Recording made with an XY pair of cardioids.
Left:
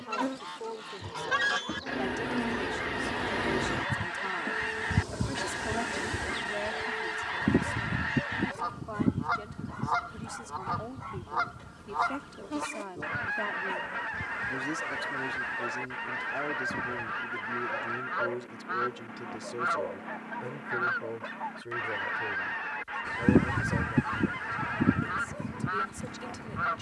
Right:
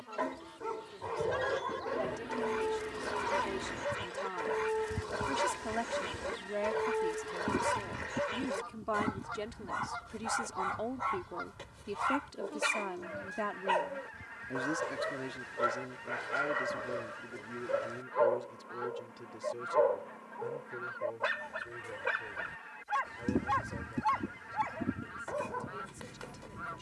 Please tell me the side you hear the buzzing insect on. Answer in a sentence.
You can hear the buzzing insect on the left.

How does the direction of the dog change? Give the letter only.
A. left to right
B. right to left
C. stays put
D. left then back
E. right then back
C.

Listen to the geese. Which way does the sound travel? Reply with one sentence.
You can hear the geese stay in one place.